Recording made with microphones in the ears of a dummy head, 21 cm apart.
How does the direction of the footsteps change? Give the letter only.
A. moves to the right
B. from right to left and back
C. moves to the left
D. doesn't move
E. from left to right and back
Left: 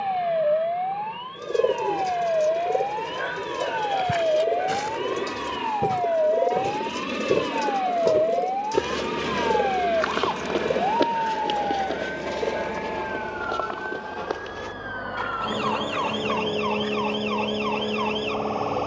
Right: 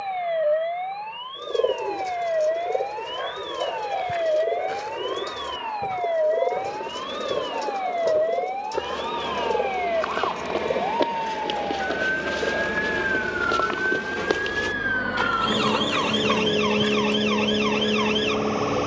A.